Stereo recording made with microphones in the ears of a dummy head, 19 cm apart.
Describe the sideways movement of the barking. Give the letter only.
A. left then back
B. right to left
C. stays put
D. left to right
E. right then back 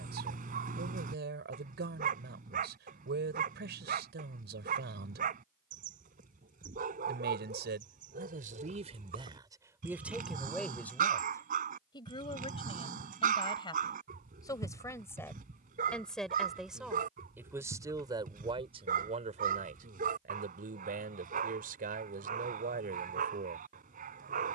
C.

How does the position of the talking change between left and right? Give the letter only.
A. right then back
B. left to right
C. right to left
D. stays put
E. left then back
E.